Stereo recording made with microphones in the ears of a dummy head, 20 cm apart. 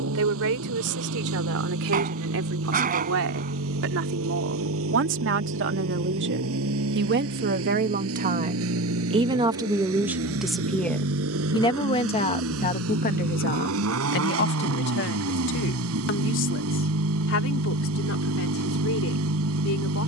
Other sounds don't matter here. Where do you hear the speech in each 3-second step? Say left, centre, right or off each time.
right, right, right, centre, left, left, left.